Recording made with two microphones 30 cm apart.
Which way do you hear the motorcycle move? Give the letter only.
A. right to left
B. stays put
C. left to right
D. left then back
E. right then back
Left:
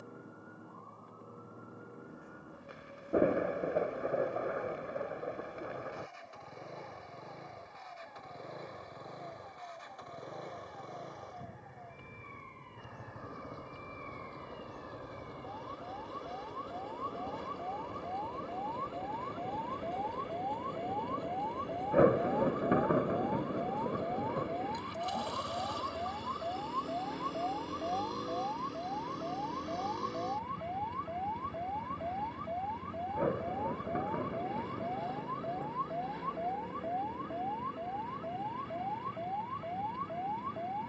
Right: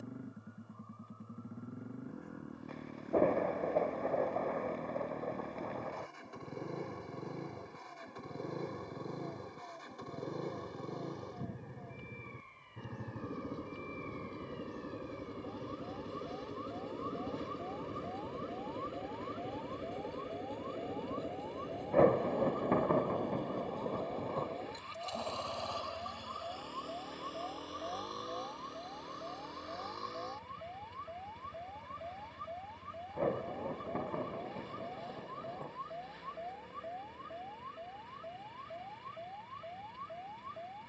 A.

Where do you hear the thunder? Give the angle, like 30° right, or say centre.
10° left.